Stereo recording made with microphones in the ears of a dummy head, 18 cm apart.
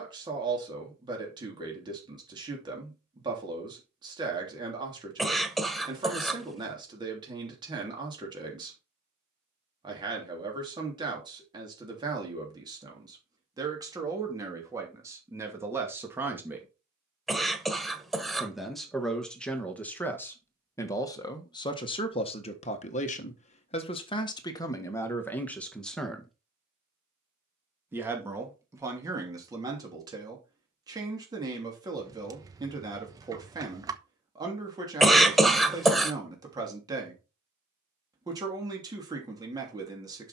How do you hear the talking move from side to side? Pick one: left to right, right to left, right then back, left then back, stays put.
left then back.